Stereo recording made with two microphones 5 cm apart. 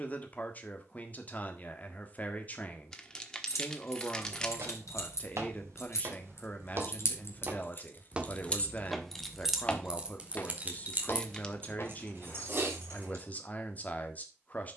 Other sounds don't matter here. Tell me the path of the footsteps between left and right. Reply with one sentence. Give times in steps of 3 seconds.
You can hear the footsteps not at all from 0 s, on the right from 3 s and on the left from 9 s.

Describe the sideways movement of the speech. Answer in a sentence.
In this clip you hear the speech stay put.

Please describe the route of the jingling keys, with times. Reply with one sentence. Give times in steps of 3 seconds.
You can hear the jingling keys not at all from 0 s, on the left from 3 s and on the right from 9 s.